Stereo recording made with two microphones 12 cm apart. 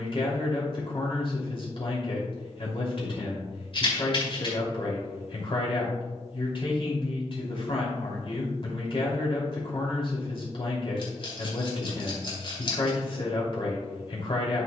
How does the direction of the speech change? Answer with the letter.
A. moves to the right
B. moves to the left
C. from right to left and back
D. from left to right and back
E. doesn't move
E.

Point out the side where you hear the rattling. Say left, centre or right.
left.